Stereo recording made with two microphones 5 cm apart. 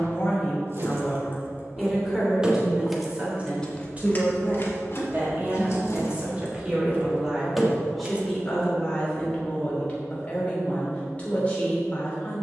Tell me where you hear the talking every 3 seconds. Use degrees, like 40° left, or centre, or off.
centre, 30° right, 10° right, 20° left.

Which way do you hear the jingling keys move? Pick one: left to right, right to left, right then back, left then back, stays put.
left then back.